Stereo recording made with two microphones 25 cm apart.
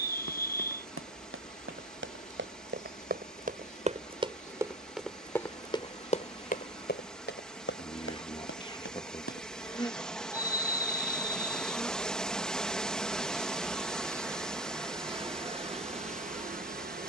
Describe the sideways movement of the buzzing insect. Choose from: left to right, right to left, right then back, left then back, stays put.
left to right.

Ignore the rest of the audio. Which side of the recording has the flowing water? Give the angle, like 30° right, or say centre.
centre.